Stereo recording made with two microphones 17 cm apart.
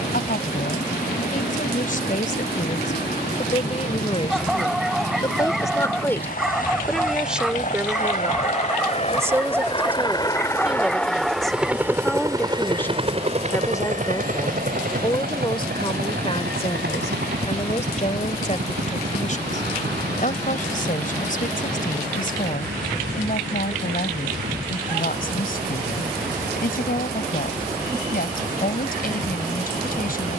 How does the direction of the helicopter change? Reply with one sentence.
You can hear the helicopter move from left to right.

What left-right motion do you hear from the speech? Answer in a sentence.
You can hear the speech go right and come back.